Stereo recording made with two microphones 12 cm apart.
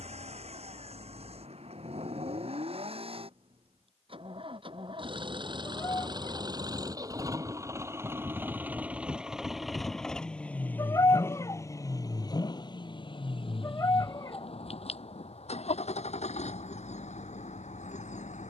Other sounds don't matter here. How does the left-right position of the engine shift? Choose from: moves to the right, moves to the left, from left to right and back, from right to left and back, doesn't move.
moves to the left.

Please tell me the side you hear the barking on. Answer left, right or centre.
left.